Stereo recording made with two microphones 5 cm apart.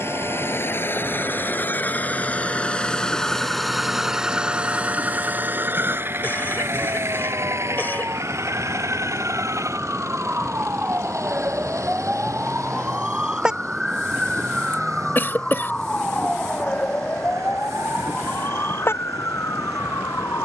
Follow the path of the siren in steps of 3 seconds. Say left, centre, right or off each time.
right, right, right, right, centre, left, left.